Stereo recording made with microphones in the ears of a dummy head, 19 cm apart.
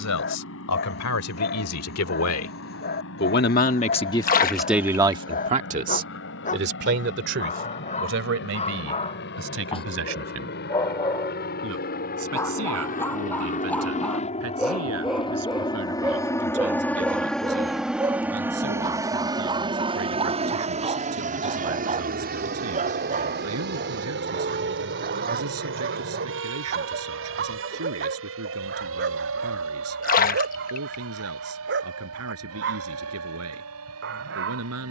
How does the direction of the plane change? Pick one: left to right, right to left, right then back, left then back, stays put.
left to right.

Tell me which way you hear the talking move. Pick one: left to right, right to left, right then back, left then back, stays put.
left to right.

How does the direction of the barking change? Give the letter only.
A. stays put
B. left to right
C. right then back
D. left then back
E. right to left
B.